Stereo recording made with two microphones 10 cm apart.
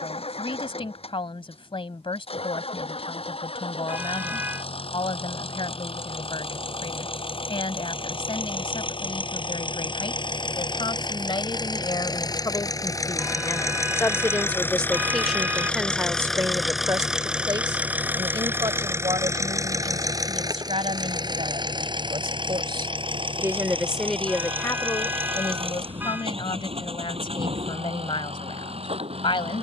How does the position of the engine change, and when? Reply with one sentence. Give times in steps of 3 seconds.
You can hear the engine on the left from 0 s, in the centre from 15 s and on the right from 18 s.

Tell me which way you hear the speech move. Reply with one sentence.
You can hear the speech move from left to right and back again.